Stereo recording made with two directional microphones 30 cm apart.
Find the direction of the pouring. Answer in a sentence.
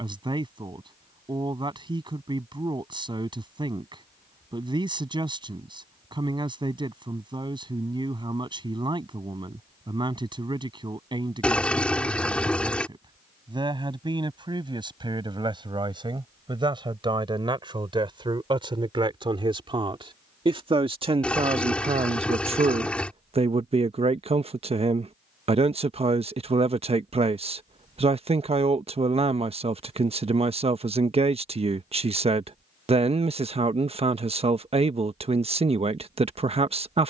You can hear the pouring in the centre.